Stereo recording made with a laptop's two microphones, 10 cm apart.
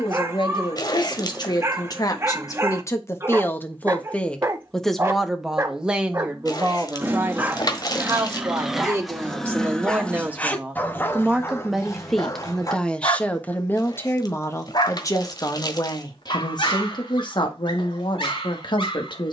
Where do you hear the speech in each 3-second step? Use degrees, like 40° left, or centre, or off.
50° left, 10° left, 20° right, 20° right, 20° left, 50° left, 60° left.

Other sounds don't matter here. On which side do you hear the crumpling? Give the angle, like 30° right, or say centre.
50° left.